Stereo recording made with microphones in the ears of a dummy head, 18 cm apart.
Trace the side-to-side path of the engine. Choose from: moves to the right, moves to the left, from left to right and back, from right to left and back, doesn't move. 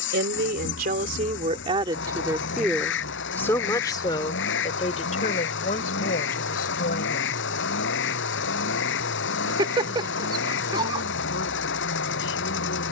doesn't move.